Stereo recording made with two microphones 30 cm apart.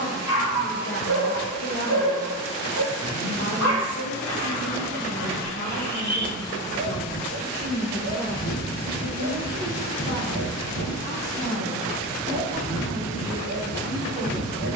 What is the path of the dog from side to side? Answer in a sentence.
You can hear the dog stay put.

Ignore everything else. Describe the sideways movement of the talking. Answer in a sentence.
In this clip you hear the talking go from the left side to the right.